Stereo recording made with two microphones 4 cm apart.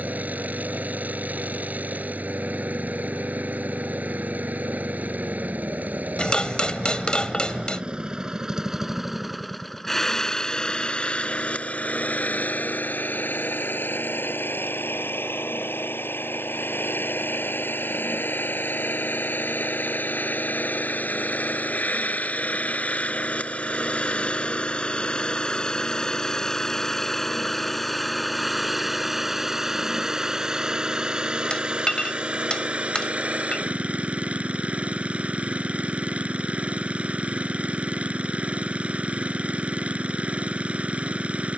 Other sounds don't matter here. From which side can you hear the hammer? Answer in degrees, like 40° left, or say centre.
20° left.